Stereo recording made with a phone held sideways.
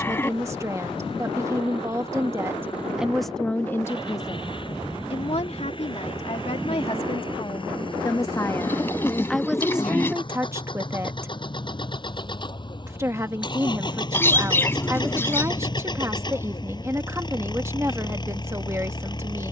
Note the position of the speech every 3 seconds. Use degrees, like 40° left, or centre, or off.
20° right, 30° left, 30° left, 10° right, 20° right, 20° right, 20° right.